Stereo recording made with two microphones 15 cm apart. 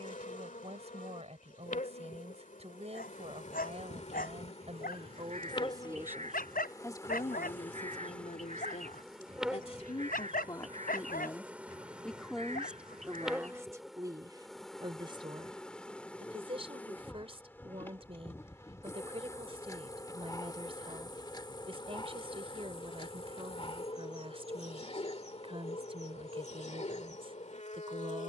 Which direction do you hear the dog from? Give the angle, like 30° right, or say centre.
80° left.